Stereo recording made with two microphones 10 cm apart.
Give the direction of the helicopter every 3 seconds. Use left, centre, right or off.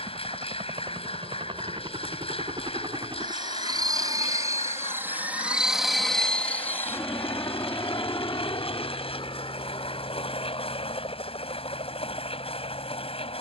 right, right, left, left, left.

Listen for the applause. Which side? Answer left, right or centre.
left.